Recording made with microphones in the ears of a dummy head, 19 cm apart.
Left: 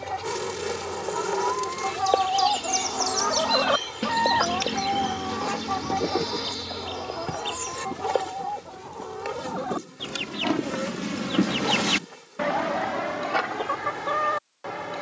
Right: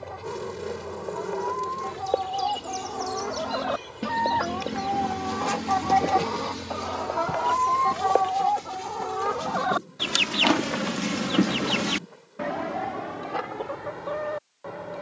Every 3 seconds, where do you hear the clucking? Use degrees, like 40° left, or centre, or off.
60° left, 20° left, 50° right, 30° right, 60° left.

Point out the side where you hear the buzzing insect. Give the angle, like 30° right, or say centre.
60° left.